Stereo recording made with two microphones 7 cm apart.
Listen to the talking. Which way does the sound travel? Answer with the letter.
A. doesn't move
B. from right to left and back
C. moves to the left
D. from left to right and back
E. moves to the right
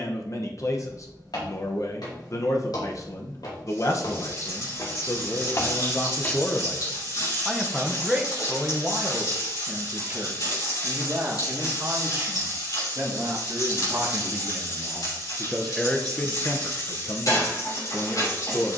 D.